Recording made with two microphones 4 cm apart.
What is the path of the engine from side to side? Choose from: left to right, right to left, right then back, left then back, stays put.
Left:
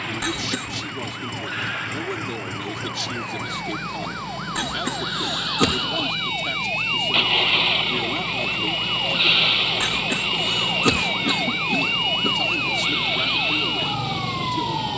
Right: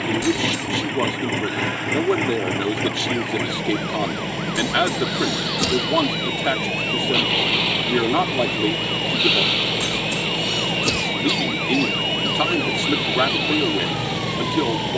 stays put.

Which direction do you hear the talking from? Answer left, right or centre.
right.